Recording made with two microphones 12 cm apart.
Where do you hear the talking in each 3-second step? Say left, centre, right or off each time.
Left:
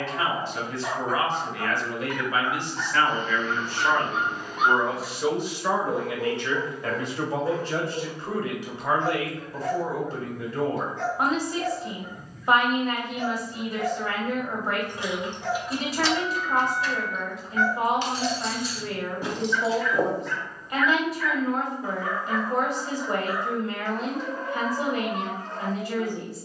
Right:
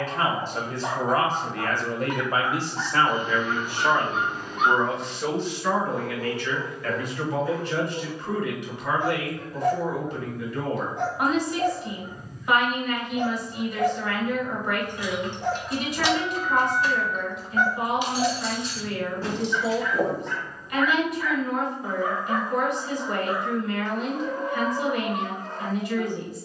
right, centre, left, left, left, left, left, left, left.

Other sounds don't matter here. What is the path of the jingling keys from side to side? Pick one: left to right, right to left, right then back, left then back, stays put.
right then back.